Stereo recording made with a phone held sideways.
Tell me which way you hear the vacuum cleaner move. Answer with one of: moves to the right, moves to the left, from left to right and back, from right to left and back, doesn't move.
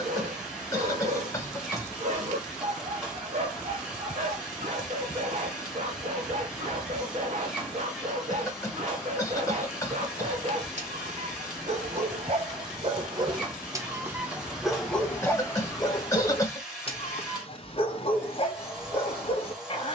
doesn't move.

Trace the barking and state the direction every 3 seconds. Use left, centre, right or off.
right, right, right, right, right, left, left.